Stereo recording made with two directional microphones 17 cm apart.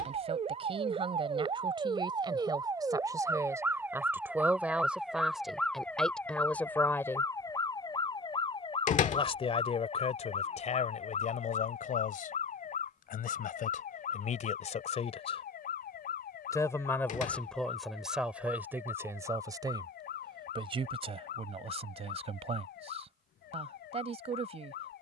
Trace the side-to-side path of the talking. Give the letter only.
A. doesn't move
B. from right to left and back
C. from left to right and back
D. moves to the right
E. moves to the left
B.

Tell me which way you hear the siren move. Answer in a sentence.
In this clip you hear the siren travel towards the left.